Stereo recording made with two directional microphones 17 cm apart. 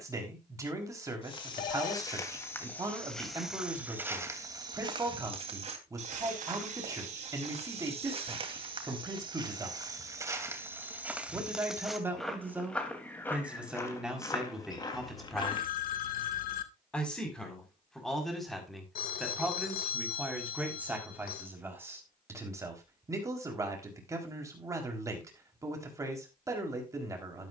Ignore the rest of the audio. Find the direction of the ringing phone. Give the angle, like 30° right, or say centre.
60° left.